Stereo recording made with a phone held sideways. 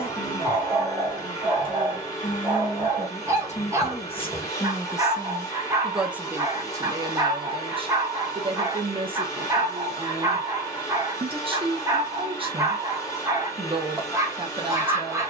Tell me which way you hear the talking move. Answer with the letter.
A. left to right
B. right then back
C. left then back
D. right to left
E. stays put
A.